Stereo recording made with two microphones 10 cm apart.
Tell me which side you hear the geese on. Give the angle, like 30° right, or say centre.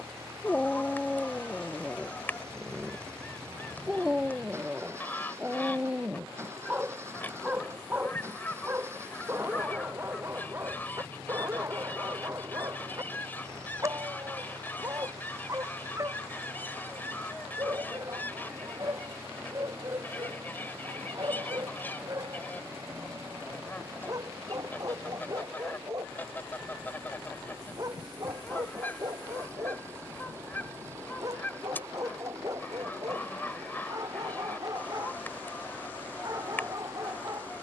20° left.